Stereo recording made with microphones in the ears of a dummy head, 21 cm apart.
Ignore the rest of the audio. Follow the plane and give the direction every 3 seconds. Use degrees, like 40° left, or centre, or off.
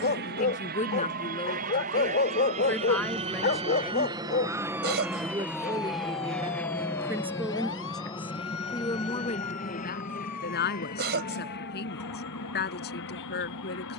40° right, 10° right, 10° left, 40° left, 50° left.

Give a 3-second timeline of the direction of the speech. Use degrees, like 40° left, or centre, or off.
20° left, 10° right, centre, 40° left, 40° left.